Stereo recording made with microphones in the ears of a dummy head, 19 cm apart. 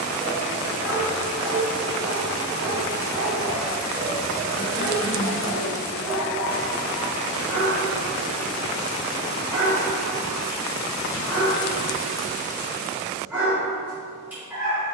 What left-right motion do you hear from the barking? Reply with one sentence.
In this clip you hear the barking stay in one place.